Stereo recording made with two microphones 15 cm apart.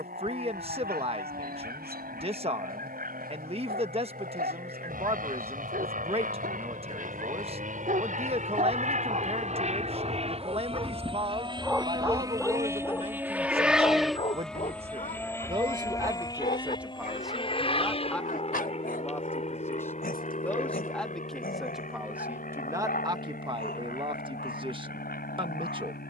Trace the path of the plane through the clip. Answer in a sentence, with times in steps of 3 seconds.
In this clip you hear the plane on the right from 0 s, in the centre from 12 s and on the left from 15 s.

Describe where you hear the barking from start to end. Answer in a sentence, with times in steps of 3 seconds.
You can hear the barking on the right from 0 s and on the left from 12 s.